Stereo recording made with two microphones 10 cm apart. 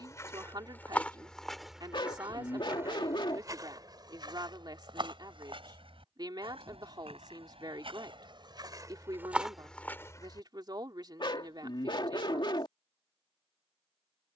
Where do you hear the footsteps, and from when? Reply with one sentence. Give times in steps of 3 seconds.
In this clip you hear the footsteps in the centre from 0 s, on the right from 3 s, in the centre from 9 s and not at all from 12 s.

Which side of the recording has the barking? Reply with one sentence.
In this clip you hear the barking on the left.